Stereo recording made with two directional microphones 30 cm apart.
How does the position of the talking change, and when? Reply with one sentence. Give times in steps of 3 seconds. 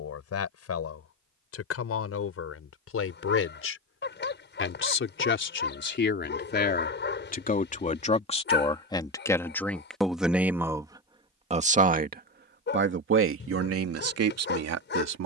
In this clip you hear the talking on the left from 0 s, in the centre from 9 s and on the right from 12 s.